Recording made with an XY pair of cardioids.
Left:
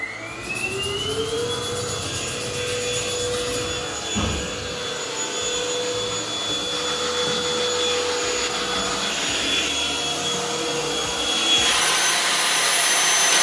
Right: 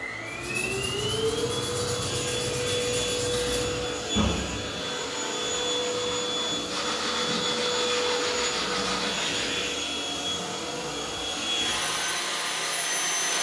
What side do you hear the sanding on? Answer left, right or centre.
centre.